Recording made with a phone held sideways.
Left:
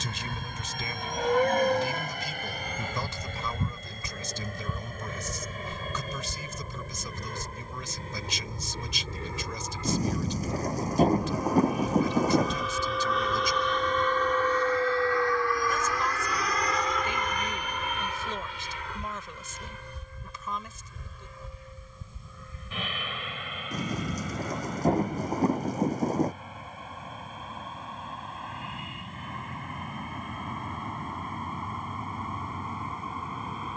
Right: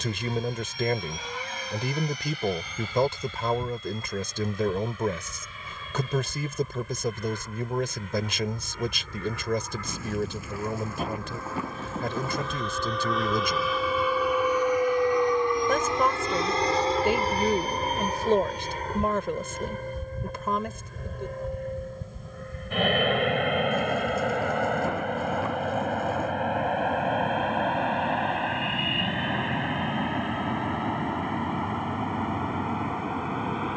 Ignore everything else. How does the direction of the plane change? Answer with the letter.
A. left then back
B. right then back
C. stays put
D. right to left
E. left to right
E.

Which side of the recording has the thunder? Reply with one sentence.
In this clip you hear the thunder on the left.